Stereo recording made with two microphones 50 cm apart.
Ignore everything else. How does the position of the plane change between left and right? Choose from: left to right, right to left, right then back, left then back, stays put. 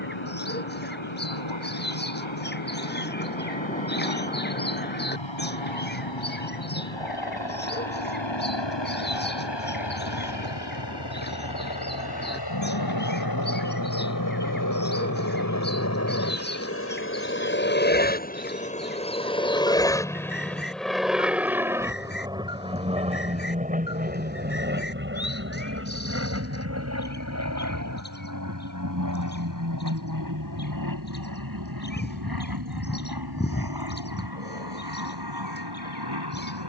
left to right.